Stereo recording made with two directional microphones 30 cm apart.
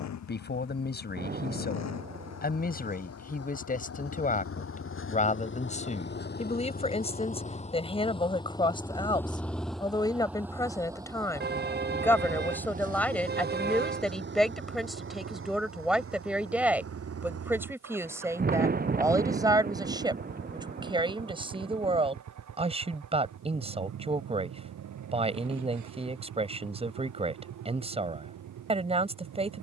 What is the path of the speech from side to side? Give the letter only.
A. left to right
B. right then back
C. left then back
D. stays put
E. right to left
A.